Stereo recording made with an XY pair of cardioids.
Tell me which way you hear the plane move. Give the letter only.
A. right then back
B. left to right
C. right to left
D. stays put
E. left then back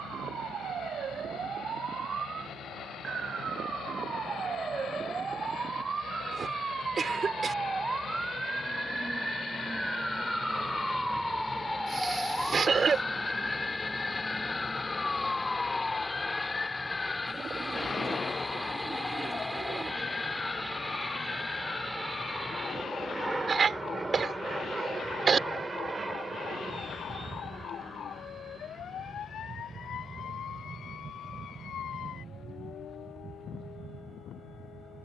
B.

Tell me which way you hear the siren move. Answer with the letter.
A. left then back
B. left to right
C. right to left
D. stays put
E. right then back
C.